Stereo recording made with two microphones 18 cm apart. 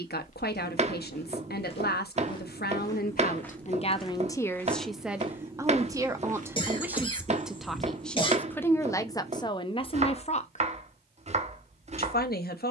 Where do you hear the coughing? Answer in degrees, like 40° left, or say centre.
30° left.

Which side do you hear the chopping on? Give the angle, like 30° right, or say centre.
40° right.